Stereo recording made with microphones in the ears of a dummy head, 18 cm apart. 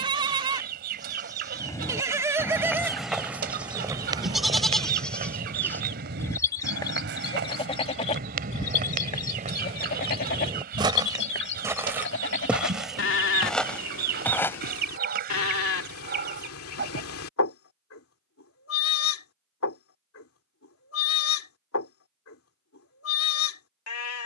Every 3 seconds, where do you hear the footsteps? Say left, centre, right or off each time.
centre, right, right, right, centre, off, off, off.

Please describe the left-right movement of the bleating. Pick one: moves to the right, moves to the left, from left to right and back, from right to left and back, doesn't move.
moves to the left.